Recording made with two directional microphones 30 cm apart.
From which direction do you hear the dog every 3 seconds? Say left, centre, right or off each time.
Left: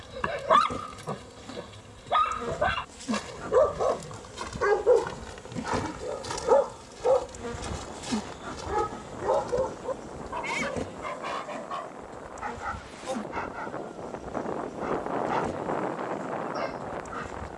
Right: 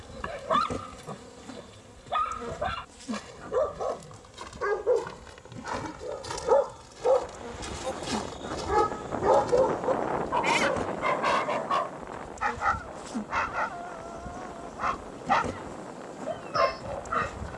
left, left, centre, right, right, right.